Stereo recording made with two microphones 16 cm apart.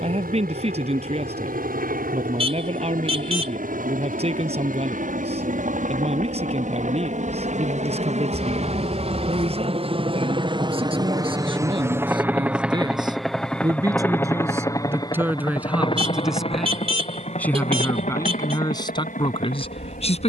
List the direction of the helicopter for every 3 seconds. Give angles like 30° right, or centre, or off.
70° right, 60° right, 50° right, 30° right, centre, 40° left, 60° left.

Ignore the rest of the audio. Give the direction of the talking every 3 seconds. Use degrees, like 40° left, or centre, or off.
40° right, 40° right, 40° right, 40° right, 20° right, centre, 30° left.